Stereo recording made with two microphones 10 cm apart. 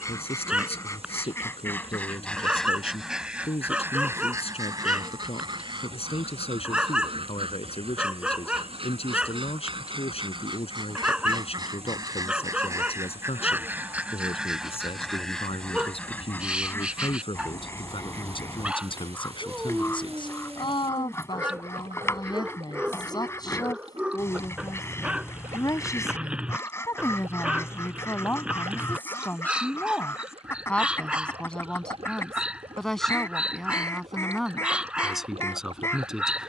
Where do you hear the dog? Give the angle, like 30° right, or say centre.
10° right.